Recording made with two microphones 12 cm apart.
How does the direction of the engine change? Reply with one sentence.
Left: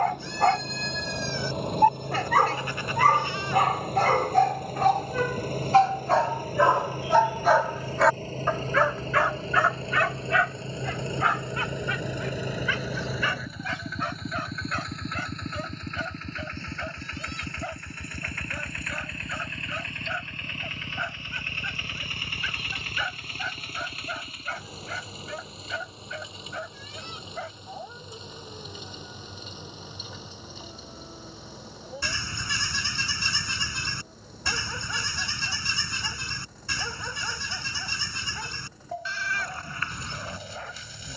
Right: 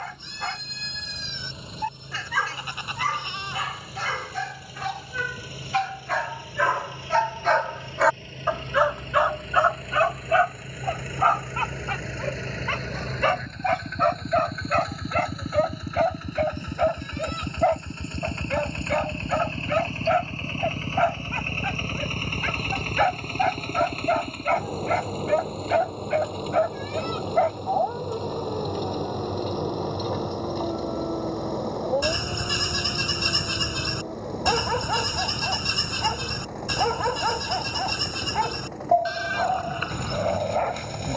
In this clip you hear the engine travel towards the right.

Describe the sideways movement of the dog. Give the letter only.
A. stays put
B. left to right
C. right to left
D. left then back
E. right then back
B.